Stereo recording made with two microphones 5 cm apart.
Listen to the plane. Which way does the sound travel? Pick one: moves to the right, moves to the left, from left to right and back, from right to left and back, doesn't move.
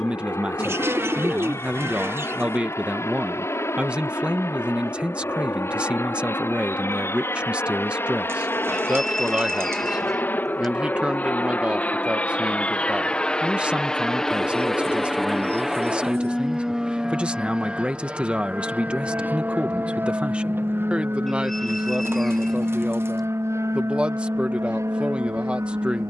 moves to the right.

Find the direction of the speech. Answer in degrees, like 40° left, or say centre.
20° right.